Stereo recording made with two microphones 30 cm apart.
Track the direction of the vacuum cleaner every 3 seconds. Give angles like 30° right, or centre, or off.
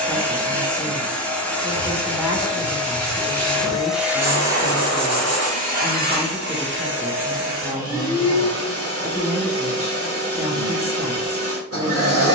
centre, 10° right, 50° right, 50° right.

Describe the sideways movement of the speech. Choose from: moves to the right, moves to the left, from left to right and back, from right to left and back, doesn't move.
doesn't move.